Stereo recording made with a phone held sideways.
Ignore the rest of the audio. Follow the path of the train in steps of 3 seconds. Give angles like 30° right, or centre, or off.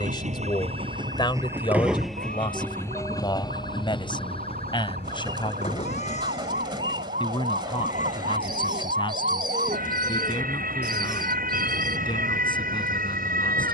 20° right, 40° left, 50° left, 60° left, 60° left.